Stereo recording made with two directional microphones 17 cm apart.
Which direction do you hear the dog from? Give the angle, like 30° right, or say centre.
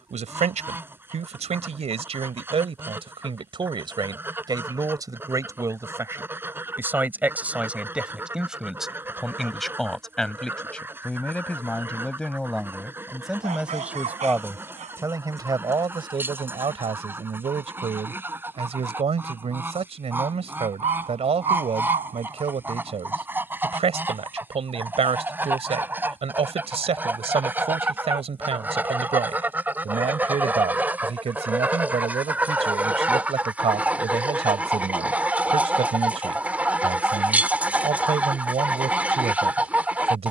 40° right.